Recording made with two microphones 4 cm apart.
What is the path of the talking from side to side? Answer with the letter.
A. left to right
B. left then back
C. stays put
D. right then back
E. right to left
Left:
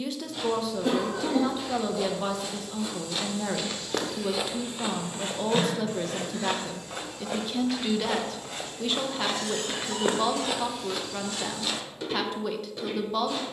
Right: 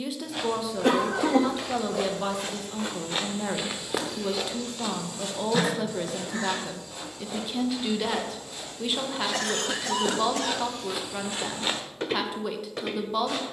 C.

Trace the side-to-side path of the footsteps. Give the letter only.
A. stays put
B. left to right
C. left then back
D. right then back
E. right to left
C.